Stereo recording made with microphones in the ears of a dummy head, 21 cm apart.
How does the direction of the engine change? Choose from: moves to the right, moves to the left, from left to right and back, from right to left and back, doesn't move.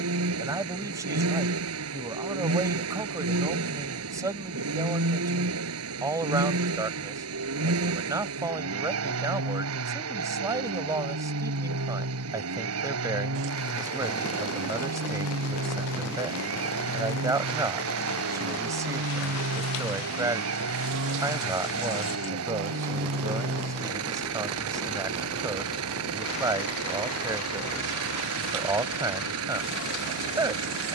doesn't move.